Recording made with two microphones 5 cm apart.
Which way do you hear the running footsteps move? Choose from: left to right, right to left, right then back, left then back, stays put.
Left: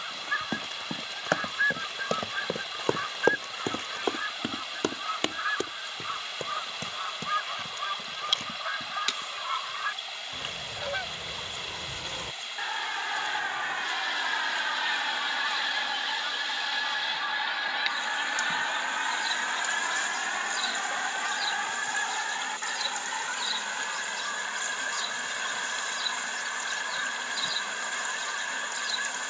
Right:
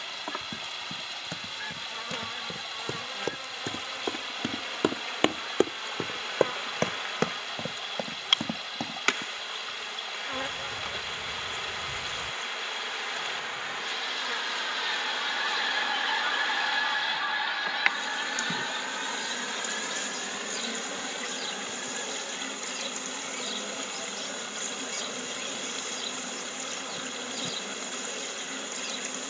left to right.